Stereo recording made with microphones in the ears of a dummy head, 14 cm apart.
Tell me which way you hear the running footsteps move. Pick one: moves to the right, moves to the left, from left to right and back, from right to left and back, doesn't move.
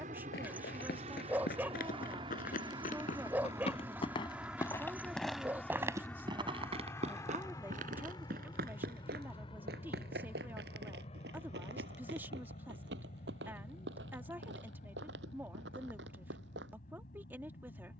moves to the right.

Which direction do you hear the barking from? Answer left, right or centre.
centre.